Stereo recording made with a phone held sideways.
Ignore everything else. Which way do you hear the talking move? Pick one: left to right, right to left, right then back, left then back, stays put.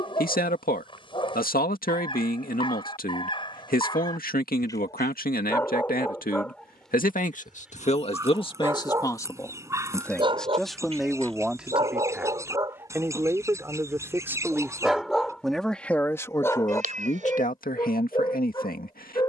right then back.